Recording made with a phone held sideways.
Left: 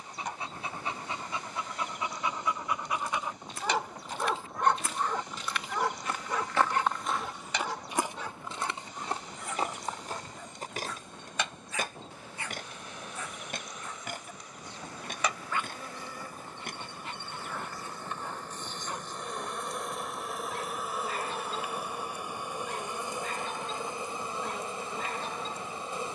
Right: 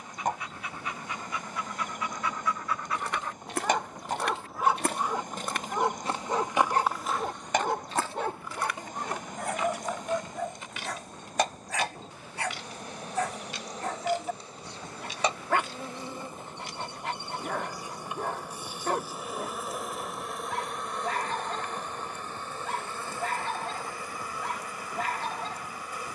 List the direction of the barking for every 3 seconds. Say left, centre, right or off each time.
left, centre, right, right, right, right, right, right, right.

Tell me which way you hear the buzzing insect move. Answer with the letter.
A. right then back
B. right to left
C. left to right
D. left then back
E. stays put
B.